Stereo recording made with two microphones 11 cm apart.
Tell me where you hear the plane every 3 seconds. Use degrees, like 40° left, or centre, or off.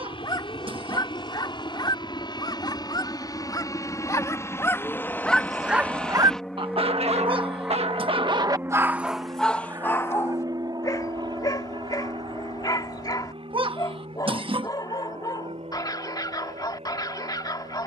50° left, 20° left, 10° right, 30° right, 50° right, 60° right.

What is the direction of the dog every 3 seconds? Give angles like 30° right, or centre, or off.
40° left, 20° left, 50° right, 20° left, 40° left, 40° left.